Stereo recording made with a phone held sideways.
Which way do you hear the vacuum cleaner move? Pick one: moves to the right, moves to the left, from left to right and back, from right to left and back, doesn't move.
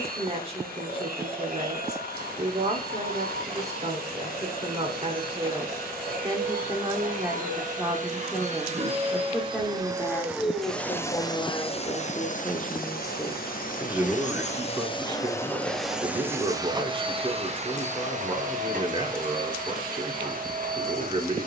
from right to left and back.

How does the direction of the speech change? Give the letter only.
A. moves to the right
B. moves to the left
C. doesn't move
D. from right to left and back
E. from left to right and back
D.